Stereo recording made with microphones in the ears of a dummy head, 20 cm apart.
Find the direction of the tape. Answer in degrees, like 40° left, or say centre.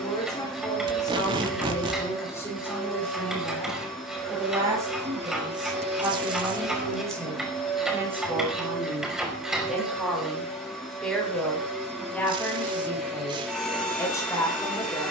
20° right.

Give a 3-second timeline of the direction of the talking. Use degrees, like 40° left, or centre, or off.
10° left, 10° right, 10° right, centre, 10° left.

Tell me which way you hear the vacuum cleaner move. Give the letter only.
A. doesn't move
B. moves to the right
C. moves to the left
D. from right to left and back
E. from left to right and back
A.